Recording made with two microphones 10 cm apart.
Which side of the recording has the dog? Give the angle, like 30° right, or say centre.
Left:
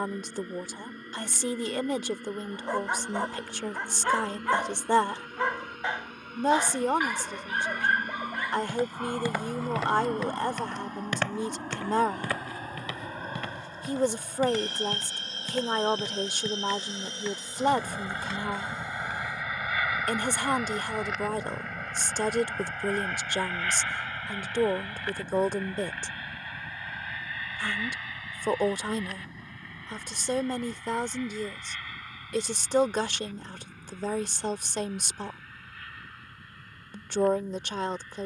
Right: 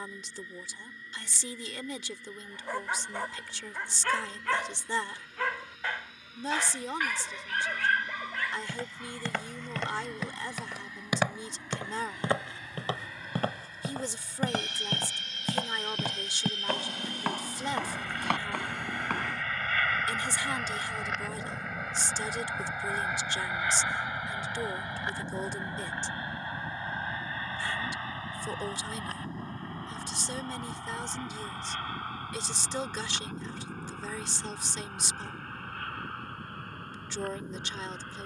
20° left.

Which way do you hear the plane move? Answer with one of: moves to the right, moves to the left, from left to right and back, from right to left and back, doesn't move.
moves to the right.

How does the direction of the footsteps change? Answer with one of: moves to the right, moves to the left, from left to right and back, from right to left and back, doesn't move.
moves to the right.